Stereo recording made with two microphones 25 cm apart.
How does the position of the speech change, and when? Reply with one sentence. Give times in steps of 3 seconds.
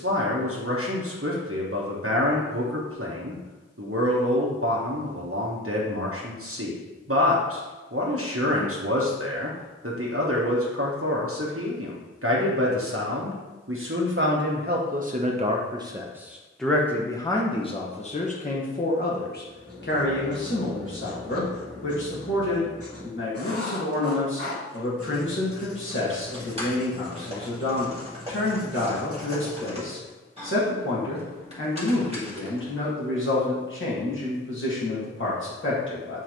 You can hear the speech on the right from 0 s, in the centre from 15 s and on the left from 18 s.